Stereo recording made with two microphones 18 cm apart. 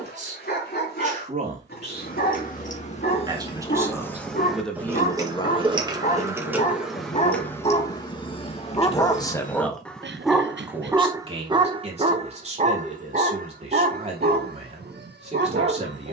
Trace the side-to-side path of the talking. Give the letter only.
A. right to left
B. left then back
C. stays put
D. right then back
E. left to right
B.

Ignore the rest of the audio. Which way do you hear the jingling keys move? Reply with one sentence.
In this clip you hear the jingling keys go right and come back.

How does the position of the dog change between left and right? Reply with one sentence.
You can hear the dog move from left to right.